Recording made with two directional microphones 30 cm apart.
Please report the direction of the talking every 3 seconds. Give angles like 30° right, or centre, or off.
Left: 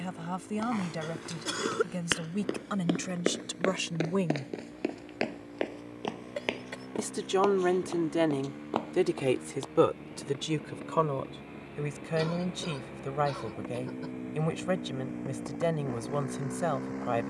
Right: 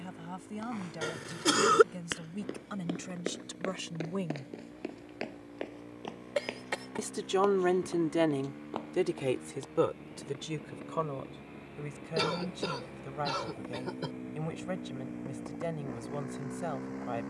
50° left, 40° left, centre, 30° left, 40° left, 40° left.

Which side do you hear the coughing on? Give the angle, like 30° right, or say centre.
60° right.